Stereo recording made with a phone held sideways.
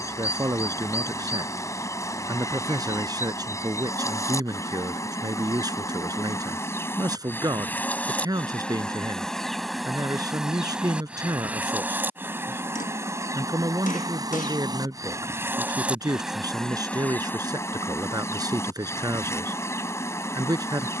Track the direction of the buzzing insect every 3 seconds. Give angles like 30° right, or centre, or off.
20° left, 20° left, 10° left, centre, 20° right, centre, 20° left.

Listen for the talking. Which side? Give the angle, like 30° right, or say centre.
20° right.